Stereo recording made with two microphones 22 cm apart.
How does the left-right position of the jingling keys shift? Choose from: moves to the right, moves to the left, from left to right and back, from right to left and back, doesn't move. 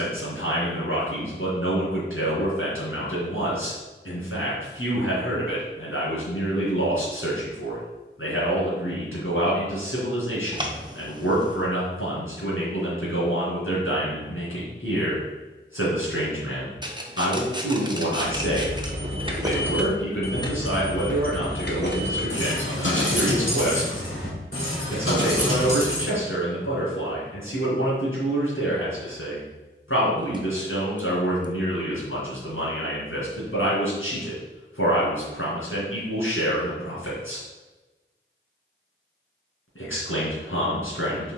moves to the left.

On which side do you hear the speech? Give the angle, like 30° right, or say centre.
80° left.